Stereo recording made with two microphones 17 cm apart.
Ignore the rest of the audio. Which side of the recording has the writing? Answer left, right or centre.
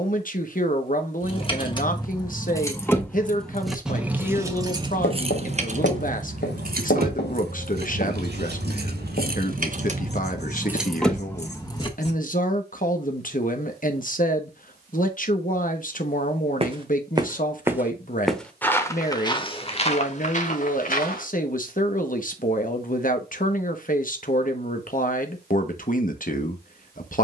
left.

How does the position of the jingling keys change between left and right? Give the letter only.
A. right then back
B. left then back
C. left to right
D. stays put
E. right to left
A.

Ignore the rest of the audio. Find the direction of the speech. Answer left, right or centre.
left.